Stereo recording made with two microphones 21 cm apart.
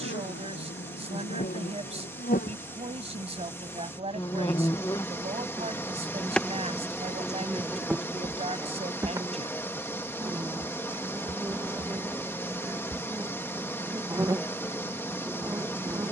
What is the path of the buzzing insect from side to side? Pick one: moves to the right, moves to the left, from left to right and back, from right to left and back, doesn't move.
moves to the right.